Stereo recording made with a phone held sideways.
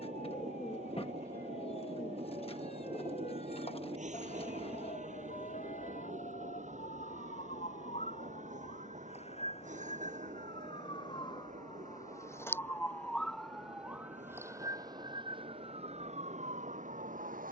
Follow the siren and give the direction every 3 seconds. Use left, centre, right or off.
left, left, left, left, centre, right.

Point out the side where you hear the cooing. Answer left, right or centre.
left.